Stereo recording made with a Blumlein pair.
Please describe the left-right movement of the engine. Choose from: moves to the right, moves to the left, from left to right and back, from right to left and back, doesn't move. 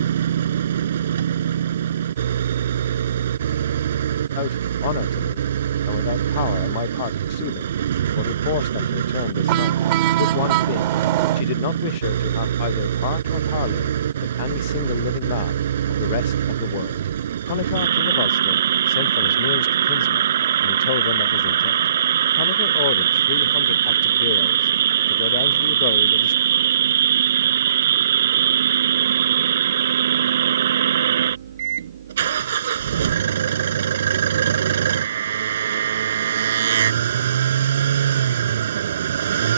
doesn't move.